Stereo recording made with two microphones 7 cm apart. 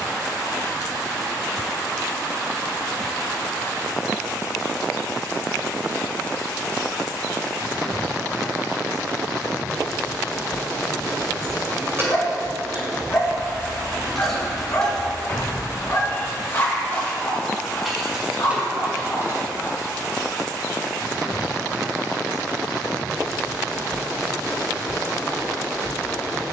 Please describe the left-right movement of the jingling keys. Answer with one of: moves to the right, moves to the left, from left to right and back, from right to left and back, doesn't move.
from right to left and back.